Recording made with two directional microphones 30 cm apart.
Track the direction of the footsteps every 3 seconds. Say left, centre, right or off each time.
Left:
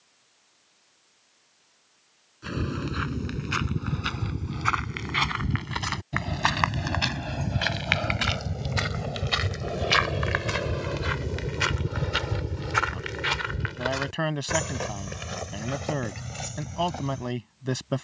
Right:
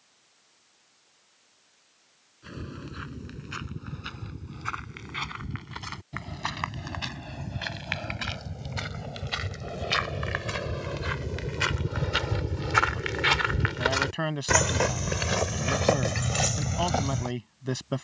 left, left, left, left, right, right.